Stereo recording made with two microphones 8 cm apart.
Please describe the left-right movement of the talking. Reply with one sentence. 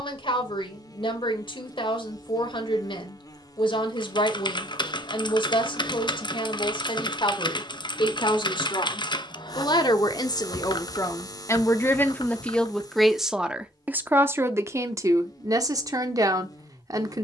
In this clip you hear the talking travel towards the right.